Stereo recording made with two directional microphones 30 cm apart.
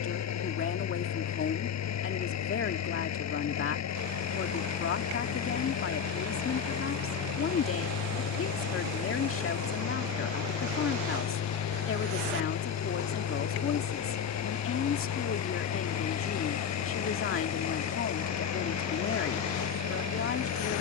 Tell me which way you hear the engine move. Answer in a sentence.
You can hear the engine stay in one place.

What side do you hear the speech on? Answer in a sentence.
You can hear the speech on the left.